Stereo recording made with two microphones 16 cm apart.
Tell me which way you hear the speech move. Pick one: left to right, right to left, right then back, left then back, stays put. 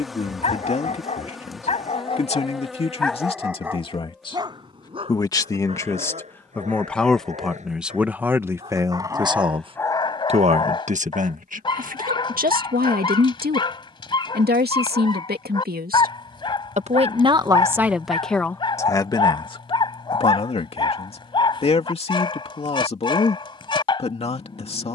right then back.